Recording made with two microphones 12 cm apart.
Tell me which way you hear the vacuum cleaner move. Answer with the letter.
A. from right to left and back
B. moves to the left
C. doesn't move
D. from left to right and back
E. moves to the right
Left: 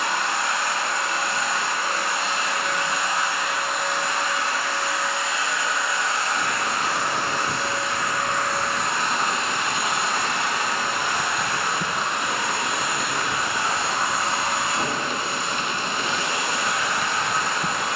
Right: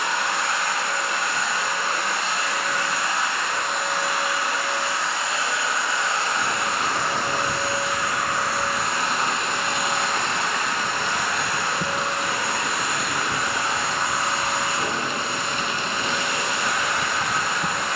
D.